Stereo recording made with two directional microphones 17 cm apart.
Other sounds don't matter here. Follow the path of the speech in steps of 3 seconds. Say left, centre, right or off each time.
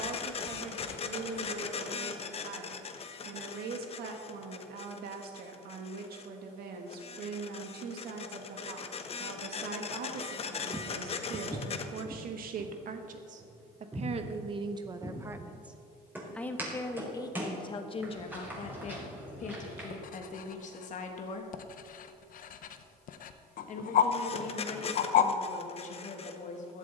right, right, right, right, right, centre, left, left, left.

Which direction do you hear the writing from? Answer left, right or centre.
left.